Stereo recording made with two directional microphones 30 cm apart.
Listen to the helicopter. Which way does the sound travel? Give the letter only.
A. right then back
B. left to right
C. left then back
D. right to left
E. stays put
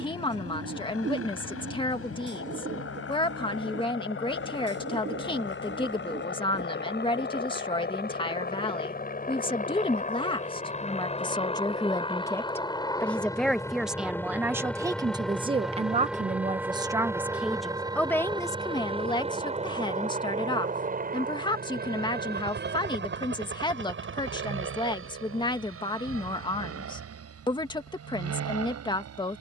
B.